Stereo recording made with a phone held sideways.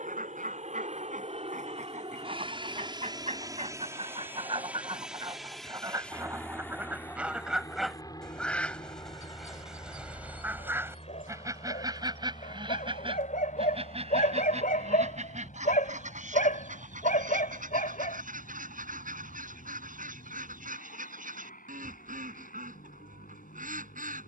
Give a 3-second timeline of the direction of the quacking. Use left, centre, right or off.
right, right, centre, centre, right, right, right, right.